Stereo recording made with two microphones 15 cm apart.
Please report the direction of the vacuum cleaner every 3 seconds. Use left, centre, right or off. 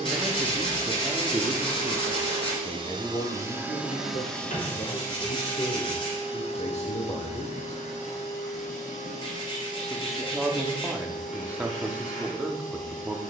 right, centre, left, left, left.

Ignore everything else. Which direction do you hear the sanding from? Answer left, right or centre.
left.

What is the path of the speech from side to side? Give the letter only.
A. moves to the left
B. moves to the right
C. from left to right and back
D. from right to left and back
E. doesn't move
D.